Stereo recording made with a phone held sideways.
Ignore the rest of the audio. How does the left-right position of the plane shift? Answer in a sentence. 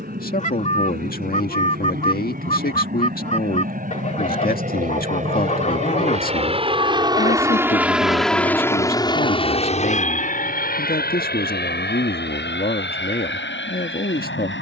In this clip you hear the plane move to the left.